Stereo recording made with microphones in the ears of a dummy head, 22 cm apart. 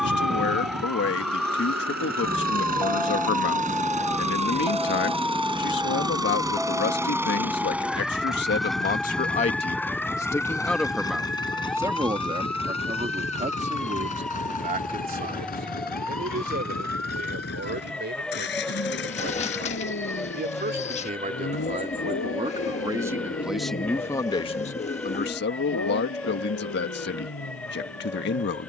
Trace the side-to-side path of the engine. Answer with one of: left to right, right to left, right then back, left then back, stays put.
right to left.